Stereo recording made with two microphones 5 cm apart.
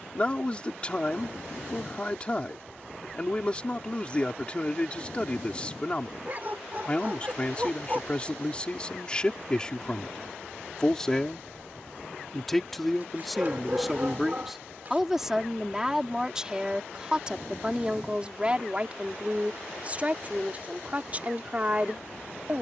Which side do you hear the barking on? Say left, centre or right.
right.